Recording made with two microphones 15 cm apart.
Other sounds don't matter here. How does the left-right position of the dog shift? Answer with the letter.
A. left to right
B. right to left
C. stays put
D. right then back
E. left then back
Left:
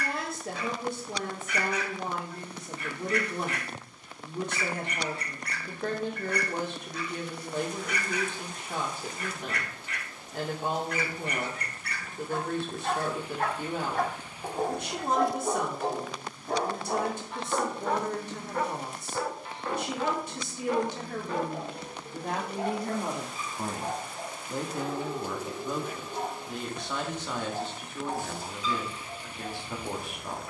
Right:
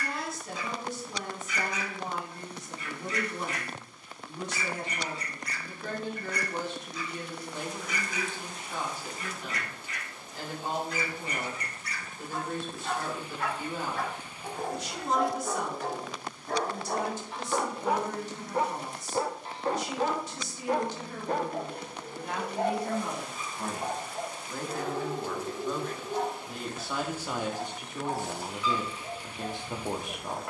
A.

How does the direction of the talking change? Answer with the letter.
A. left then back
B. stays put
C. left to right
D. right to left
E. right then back
C.